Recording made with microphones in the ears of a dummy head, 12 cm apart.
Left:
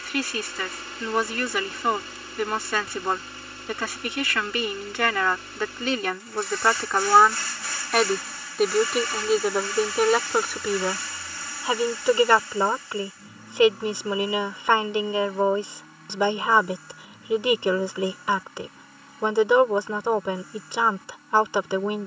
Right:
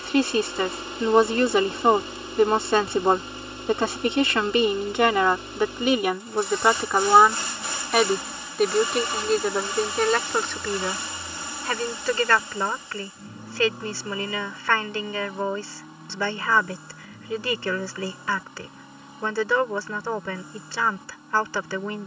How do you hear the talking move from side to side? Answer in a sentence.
You can hear the talking move from right to left.